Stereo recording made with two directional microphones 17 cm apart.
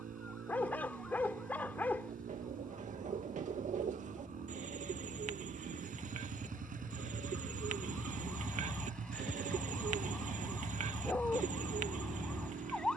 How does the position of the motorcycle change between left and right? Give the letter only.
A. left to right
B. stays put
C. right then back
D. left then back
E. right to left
B.